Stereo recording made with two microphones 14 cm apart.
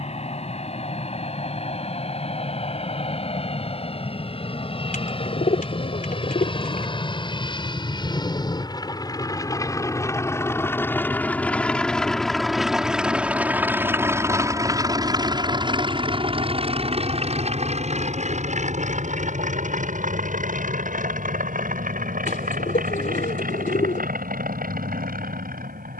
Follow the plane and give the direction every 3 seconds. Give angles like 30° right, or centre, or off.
60° left, 50° left, 40° left, 20° left, 10° right, 40° right, 60° right, 70° right, 80° right.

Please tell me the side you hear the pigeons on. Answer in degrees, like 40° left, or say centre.
80° left.